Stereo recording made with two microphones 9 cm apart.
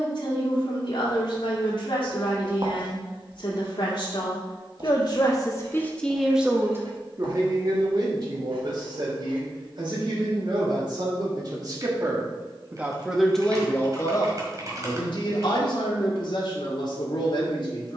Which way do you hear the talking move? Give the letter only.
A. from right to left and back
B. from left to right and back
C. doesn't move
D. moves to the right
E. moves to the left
B.